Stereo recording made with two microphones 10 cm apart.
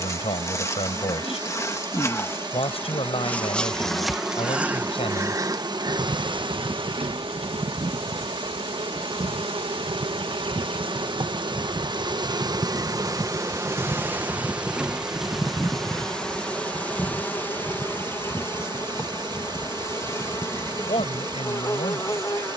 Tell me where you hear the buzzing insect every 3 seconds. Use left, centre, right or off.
left, centre, right, right, right, centre, left, left.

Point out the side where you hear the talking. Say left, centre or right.
left.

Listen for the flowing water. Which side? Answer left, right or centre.
right.